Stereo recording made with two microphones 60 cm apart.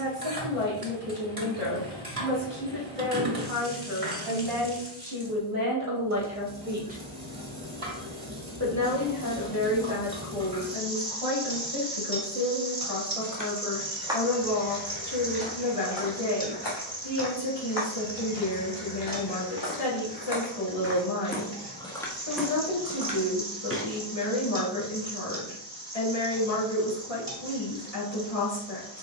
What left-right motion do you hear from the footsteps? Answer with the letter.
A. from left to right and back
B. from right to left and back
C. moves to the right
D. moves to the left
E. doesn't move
B.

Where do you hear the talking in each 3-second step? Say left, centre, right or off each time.
right, right, centre, left, left, left, left, left, left, left.